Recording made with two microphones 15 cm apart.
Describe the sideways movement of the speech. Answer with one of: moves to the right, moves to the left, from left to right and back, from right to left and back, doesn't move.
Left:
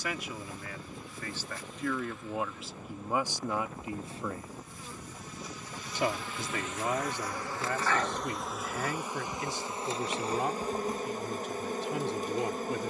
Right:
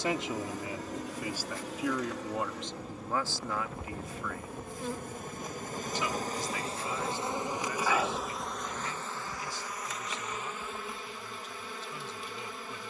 moves to the left.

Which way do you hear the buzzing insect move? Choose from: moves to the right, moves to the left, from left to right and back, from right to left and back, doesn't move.
moves to the left.